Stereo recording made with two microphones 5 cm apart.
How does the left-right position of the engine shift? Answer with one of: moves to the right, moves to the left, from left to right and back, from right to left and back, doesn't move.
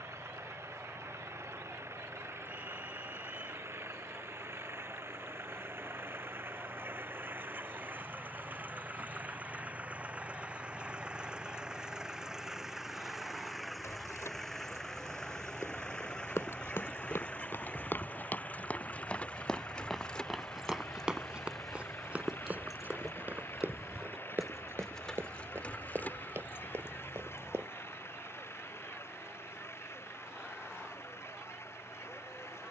moves to the left.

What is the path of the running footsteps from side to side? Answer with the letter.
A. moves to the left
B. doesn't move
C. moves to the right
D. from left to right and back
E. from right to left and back
C.